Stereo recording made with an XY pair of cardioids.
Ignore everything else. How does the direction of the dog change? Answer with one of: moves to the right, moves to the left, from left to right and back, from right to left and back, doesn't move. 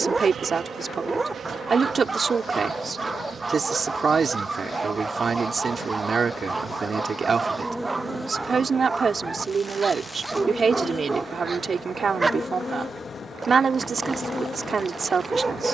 doesn't move.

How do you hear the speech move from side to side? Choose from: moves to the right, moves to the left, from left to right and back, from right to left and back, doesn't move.
doesn't move.